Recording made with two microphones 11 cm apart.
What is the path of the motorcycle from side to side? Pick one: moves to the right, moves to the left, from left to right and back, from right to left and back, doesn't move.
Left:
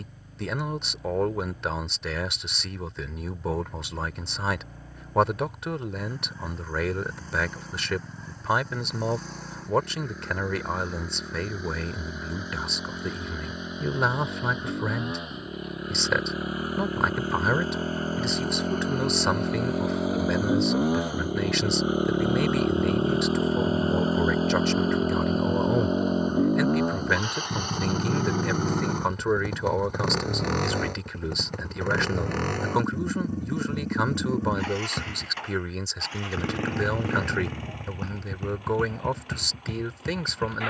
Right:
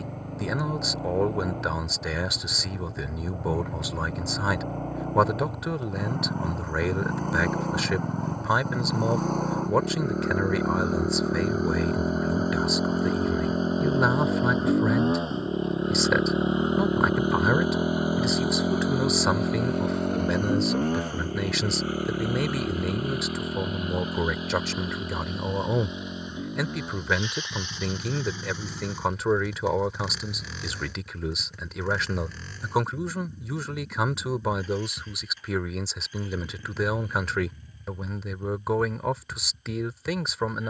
moves to the left.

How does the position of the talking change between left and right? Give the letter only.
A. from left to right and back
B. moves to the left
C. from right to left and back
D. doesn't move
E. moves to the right
D.